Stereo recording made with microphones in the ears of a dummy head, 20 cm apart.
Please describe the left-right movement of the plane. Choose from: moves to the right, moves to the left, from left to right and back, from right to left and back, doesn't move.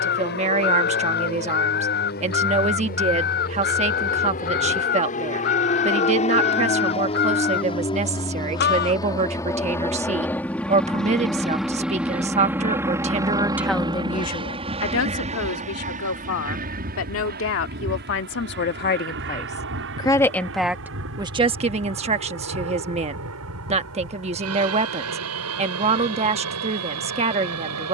moves to the right.